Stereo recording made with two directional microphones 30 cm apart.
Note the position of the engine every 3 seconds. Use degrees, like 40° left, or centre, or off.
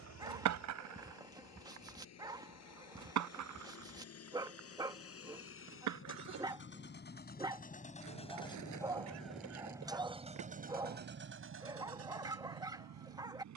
60° left, 50° left, 30° left, 20° right, 60° right.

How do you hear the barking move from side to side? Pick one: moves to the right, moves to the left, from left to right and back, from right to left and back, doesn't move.
doesn't move.